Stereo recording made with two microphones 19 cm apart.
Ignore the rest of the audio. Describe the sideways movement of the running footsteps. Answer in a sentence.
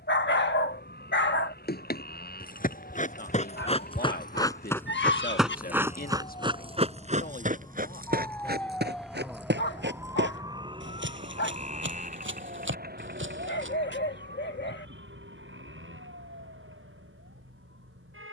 In this clip you hear the running footsteps go from the left side to the right.